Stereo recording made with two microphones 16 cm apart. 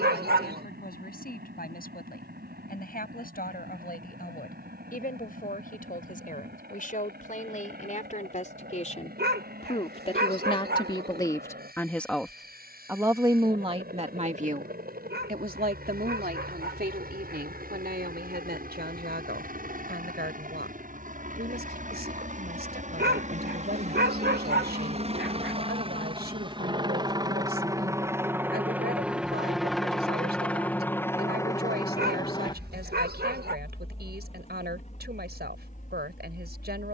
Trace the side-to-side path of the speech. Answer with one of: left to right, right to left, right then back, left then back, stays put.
left to right.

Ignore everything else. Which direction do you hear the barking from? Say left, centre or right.
right.